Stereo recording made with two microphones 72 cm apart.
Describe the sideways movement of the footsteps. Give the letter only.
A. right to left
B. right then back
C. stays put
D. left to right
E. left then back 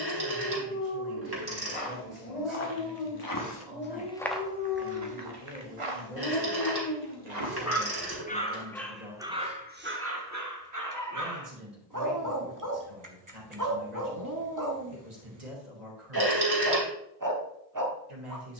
D.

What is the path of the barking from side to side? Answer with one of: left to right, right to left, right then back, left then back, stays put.
left to right.